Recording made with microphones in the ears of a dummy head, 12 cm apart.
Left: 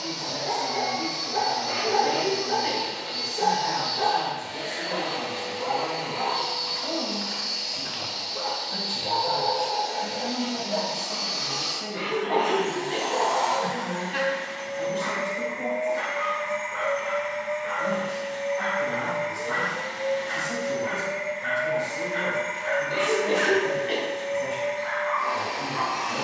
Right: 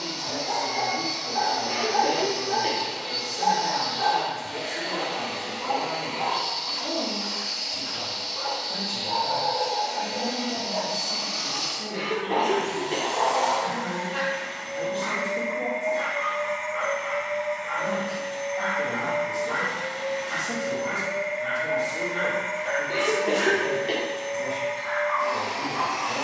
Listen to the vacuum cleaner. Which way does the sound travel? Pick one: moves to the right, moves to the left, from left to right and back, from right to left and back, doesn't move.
doesn't move.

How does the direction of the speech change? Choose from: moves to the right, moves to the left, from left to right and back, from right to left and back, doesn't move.
doesn't move.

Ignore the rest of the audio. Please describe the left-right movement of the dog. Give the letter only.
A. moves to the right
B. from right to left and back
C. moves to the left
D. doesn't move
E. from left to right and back
D.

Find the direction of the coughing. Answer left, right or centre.
right.